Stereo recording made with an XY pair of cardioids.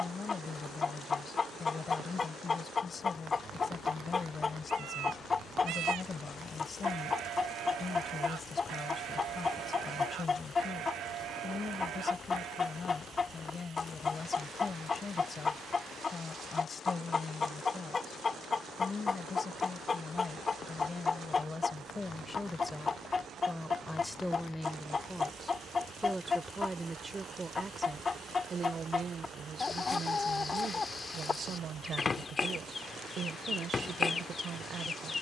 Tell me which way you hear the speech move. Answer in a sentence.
You can hear the speech go from the left side to the right.